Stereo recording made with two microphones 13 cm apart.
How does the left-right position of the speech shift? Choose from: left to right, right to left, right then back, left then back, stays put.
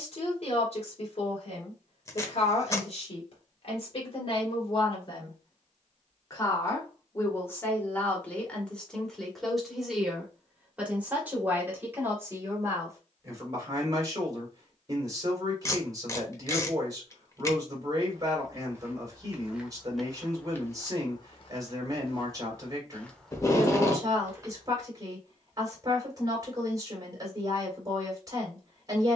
left to right.